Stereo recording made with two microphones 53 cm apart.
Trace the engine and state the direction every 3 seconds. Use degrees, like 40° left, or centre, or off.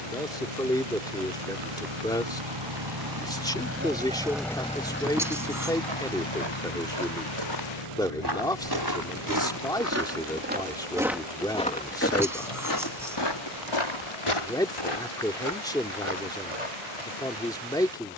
60° right, centre, 60° left, 70° left, 80° left, 80° left.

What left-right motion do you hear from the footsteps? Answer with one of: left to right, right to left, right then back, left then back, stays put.
right to left.